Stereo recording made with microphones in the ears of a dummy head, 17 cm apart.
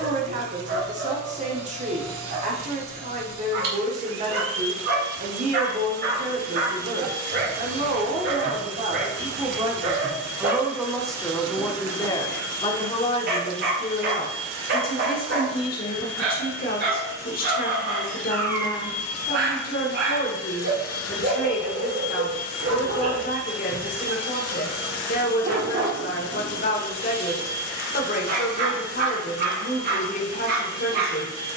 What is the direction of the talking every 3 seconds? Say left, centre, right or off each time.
right, right, right, centre, left, left, left, left, left, left, left.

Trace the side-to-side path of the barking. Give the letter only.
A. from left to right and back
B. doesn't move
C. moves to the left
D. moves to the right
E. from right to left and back
B.